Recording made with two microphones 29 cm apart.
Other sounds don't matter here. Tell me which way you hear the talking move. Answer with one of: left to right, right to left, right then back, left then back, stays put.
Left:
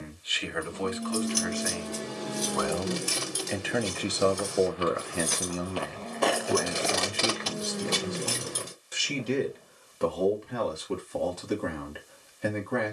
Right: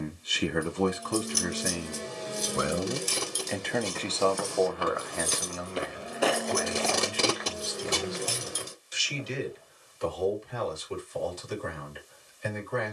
right to left.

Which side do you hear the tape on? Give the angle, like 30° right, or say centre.
60° right.